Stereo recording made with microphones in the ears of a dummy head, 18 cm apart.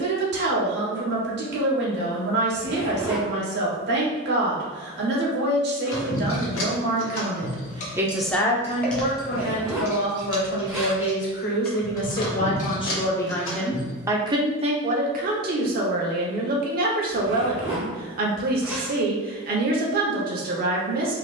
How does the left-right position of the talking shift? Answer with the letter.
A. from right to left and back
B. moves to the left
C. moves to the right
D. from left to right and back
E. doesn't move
A.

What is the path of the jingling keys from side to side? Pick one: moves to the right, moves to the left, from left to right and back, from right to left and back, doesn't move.
from left to right and back.